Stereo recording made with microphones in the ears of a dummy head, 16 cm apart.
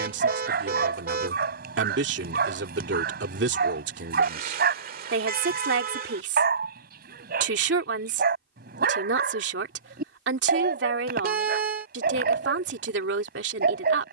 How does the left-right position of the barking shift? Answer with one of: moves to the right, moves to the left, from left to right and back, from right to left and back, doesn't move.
doesn't move.